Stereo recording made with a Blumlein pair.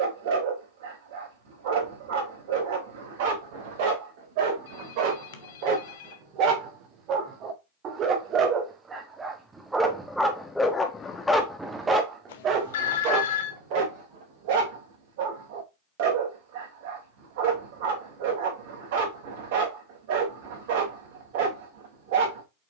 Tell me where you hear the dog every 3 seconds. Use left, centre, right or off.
right, right, right, centre, right, right, right, right.